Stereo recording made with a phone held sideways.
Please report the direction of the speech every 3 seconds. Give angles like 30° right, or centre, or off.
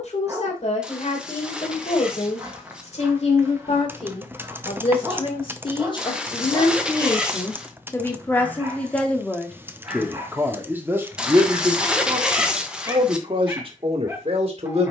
60° left, 50° left, 20° left, 10° right, 40° right.